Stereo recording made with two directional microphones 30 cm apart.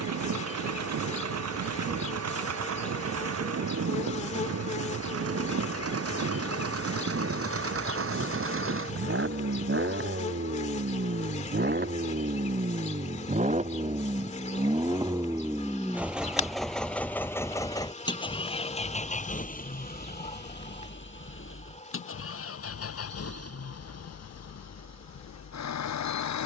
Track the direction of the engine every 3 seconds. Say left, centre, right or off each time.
right, right, right, right, right, centre, left, left, left.